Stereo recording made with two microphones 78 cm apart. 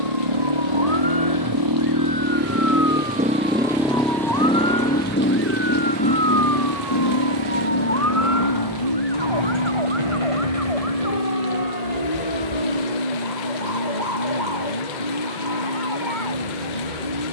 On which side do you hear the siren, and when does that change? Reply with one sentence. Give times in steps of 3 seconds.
In this clip you hear the siren on the left from 0 s, in the centre from 6 s and on the right from 9 s.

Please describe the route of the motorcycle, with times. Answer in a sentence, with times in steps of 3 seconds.
In this clip you hear the motorcycle on the right from 0 s, in the centre from 3 s and on the left from 6 s.